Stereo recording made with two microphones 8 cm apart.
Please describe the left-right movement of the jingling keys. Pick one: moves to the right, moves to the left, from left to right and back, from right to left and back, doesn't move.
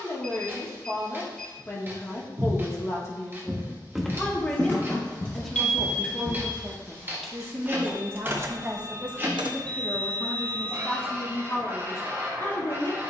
moves to the right.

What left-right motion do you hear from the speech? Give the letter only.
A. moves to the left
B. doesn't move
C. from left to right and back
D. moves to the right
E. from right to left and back
C.